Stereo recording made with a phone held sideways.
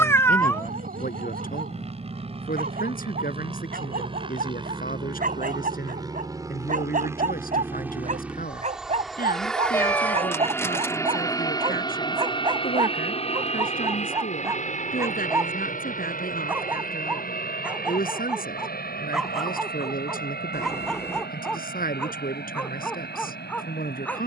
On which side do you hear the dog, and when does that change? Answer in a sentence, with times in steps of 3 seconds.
You can hear the dog on the right from 0 s and in the centre from 15 s.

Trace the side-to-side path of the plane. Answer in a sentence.
You can hear the plane move from right to left.